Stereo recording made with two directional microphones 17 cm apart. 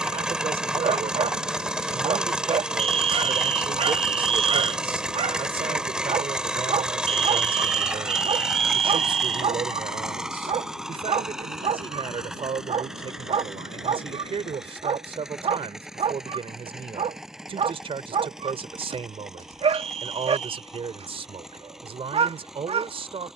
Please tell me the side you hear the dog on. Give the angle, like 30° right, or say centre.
40° right.